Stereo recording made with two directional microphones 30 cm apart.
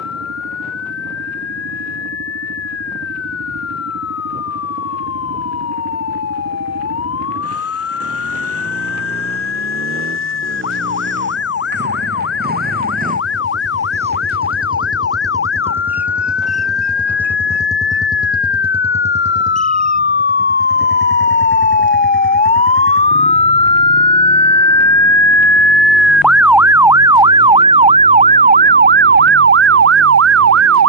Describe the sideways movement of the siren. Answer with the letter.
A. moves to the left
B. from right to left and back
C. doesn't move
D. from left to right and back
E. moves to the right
E.